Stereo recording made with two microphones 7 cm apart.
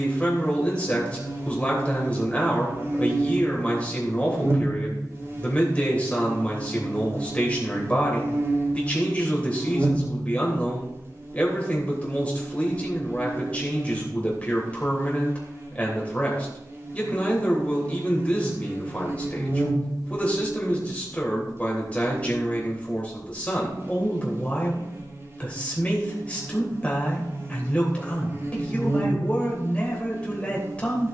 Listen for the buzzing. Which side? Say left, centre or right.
right.